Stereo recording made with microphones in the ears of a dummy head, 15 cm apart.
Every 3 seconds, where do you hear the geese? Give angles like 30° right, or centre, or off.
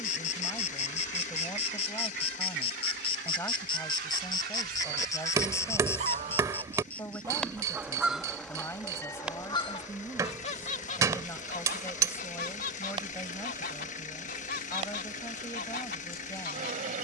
70° right, 60° right, 20° right, 40° left, 50° left, 50° left.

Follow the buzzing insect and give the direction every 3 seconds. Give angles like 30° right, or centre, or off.
40° left, 30° left, 10° left, 10° right, 30° right, 40° right.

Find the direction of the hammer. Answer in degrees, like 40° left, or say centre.
20° right.